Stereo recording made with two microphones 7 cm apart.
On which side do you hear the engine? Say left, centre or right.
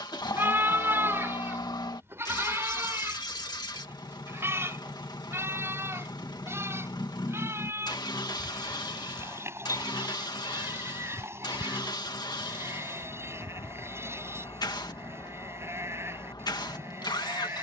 left.